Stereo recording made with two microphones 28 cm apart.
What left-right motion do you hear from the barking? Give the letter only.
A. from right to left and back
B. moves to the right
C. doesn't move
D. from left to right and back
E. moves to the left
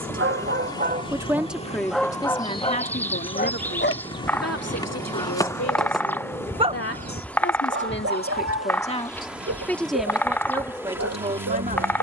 A.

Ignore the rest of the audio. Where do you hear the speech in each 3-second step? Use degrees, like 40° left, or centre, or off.
10° left, 50° left, 40° left, 10° right.